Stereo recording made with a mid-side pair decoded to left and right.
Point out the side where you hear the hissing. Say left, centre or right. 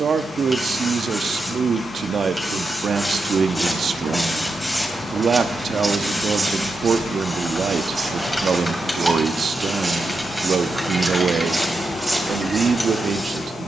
centre.